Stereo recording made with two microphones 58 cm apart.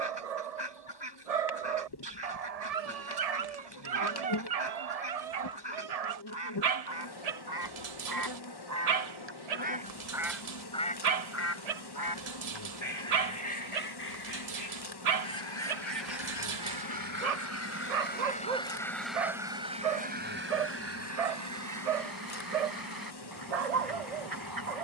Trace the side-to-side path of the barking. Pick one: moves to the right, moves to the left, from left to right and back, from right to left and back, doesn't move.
doesn't move.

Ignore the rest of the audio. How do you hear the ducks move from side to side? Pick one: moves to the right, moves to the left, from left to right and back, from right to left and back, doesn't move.
from right to left and back.